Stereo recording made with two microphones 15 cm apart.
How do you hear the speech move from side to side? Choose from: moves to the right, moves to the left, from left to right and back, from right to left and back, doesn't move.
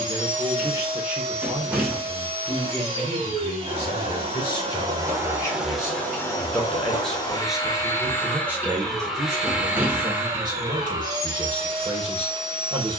from right to left and back.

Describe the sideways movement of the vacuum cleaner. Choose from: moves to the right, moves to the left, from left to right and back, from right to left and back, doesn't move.
from right to left and back.